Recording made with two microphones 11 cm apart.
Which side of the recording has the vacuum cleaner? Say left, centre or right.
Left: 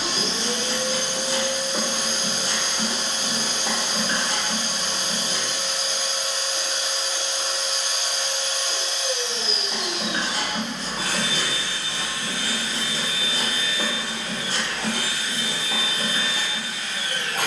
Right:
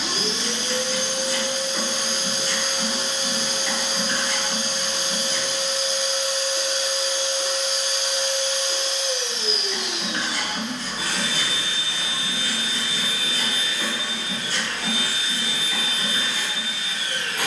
left.